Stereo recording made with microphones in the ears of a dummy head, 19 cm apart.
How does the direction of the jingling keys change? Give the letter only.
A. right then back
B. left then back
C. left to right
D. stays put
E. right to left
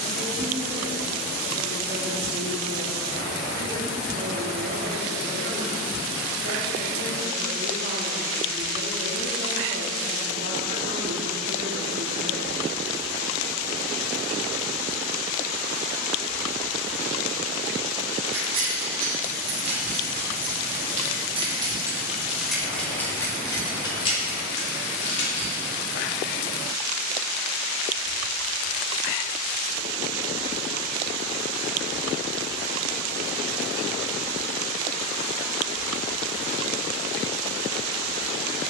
E.